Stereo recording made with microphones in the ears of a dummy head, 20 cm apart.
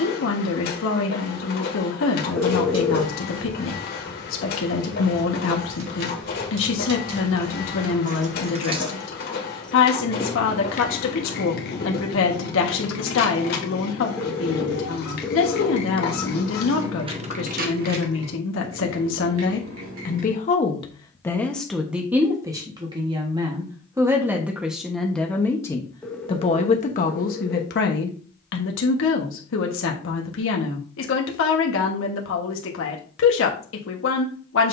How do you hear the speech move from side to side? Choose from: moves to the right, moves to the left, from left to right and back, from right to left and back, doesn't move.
from left to right and back.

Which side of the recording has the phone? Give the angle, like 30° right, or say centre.
10° left.